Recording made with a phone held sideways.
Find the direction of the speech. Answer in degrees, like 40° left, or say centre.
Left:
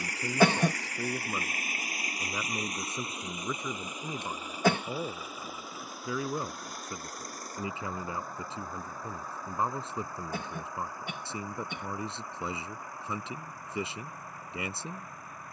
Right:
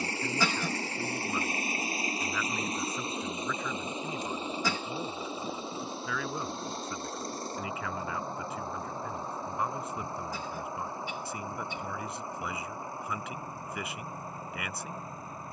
30° left.